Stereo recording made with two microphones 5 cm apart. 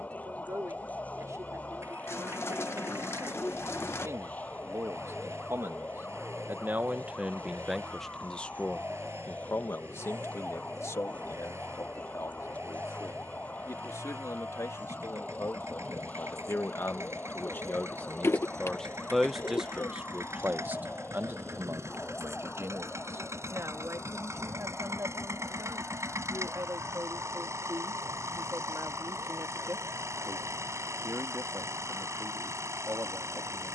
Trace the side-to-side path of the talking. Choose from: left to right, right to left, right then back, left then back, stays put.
left then back.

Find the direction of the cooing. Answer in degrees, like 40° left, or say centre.
50° left.